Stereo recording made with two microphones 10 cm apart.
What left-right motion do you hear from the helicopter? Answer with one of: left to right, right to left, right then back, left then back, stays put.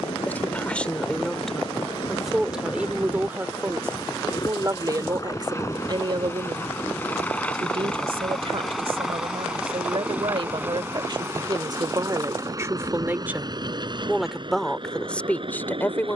left to right.